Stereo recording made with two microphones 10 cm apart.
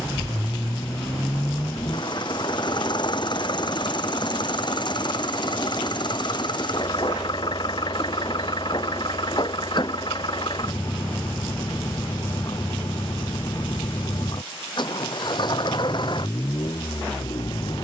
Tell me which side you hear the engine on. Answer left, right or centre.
left.